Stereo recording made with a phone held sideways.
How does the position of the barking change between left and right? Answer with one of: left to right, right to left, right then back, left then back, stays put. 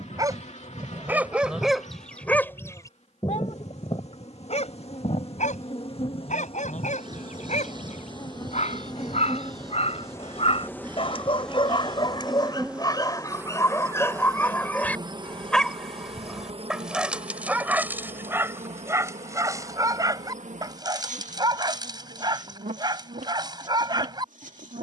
left then back.